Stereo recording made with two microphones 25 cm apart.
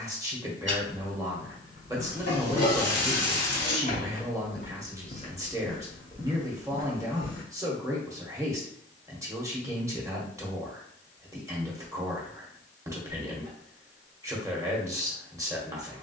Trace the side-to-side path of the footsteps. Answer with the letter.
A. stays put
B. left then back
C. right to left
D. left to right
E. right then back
B.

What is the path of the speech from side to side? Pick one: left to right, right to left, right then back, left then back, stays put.
stays put.